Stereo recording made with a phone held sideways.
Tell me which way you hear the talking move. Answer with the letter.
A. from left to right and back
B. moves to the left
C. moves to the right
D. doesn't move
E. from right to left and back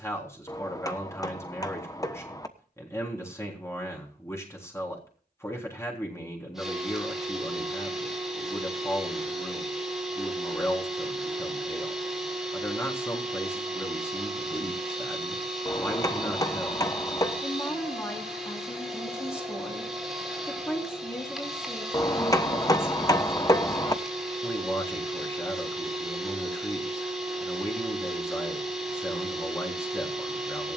D.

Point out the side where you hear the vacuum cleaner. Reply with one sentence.
In this clip you hear the vacuum cleaner in the centre.